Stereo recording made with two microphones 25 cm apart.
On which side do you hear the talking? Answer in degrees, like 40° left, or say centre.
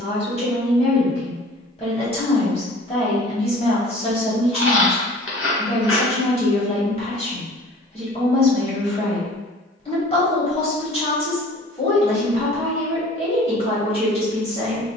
20° left.